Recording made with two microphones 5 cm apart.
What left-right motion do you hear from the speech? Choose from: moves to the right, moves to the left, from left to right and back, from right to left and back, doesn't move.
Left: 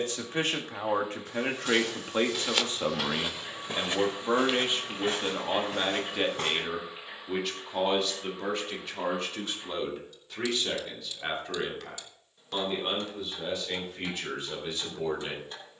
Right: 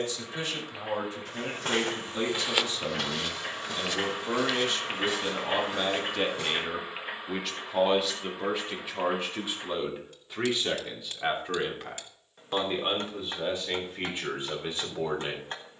moves to the right.